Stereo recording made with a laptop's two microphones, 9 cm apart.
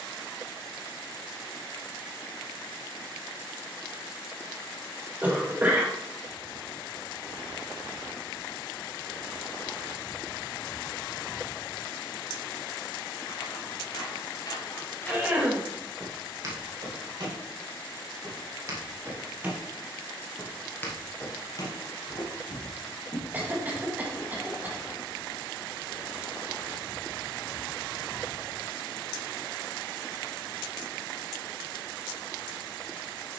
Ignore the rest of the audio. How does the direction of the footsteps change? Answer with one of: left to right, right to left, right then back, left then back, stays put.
right then back.